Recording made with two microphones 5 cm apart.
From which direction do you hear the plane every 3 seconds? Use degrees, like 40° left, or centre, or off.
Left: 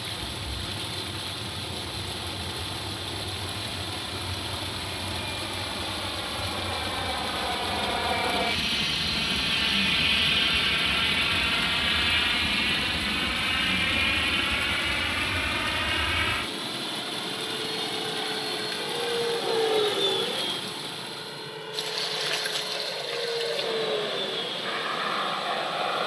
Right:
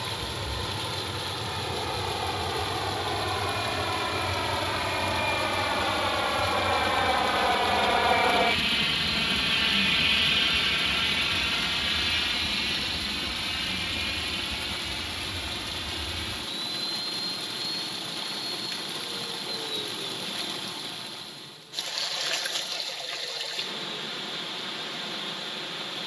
60° right, 50° right, 30° right, centre, 30° left, 50° left, 60° left, 60° left, 70° left.